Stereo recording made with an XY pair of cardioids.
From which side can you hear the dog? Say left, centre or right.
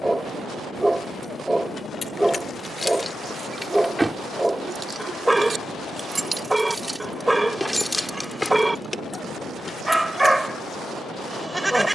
centre.